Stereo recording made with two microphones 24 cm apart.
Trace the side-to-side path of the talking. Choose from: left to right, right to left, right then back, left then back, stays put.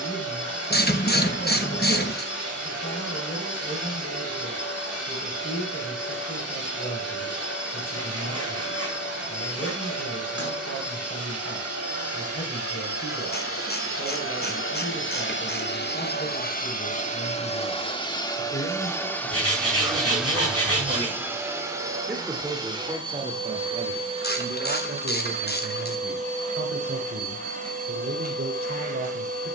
left to right.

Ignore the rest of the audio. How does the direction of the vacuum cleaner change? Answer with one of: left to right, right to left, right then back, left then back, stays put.
left to right.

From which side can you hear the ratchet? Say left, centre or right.
left.